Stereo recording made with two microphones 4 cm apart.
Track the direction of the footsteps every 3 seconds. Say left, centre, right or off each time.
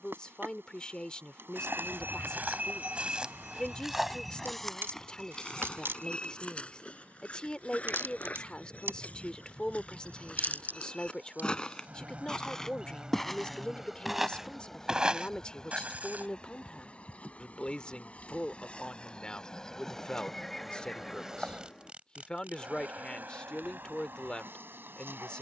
right, centre, left, left, centre, right, off, off, off.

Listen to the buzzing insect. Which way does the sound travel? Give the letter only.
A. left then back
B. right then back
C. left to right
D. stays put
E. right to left
A.